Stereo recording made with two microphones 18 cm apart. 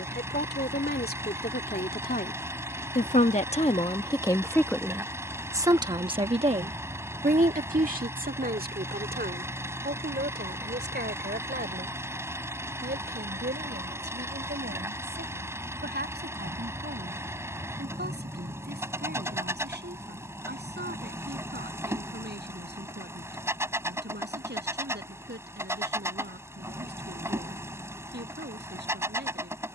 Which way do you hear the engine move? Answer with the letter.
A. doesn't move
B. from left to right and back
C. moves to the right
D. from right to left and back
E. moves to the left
A.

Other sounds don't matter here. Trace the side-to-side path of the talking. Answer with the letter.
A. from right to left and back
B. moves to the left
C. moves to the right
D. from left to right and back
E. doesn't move
C.